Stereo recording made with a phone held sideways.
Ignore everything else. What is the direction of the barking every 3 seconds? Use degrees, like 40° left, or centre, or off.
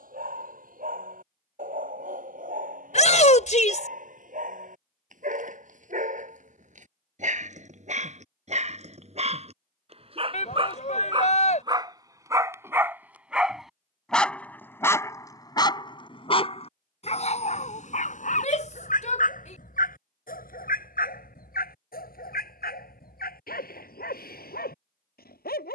60° right, 60° right, 50° right, 40° right, centre, 40° left, 60° left, 70° left, 80° left.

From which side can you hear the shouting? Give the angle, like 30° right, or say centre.
50° left.